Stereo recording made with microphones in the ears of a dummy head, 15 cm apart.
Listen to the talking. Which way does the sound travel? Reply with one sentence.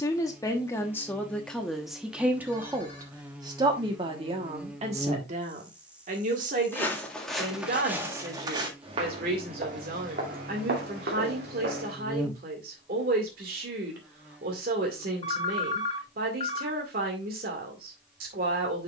In this clip you hear the talking move from left to right.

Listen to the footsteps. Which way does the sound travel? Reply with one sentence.
In this clip you hear the footsteps move from left to right.